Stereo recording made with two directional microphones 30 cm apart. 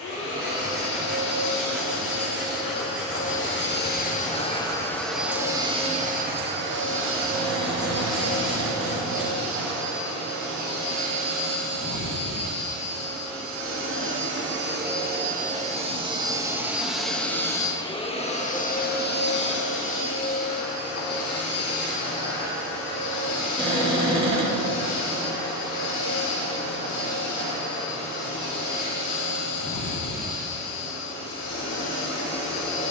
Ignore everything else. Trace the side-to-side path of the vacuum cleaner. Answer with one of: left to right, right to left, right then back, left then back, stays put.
right then back.